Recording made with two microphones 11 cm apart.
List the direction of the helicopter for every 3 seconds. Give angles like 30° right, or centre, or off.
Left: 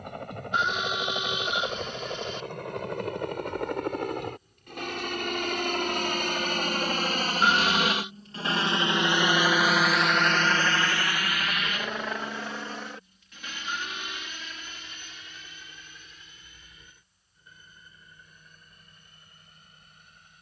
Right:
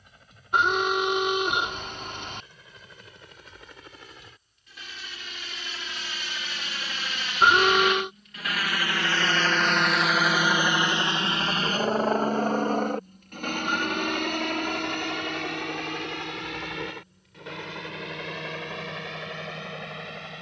70° left, 60° left, 40° left, 10° right, 50° right, 70° right, 70° right.